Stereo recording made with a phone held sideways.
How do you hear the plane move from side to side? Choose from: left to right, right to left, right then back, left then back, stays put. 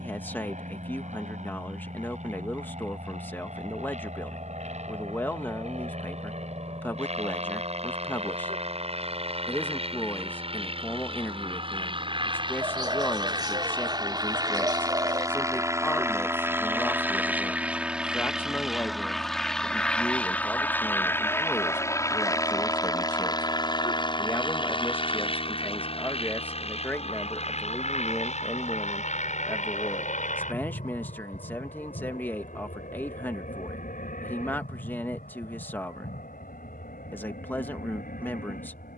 right to left.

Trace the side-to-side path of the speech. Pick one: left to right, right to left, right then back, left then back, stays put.
stays put.